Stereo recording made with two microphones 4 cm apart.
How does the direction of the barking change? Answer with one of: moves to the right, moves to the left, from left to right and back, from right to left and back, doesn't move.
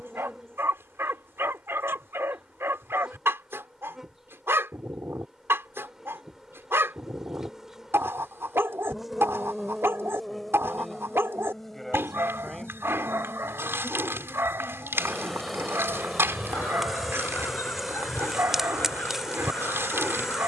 doesn't move.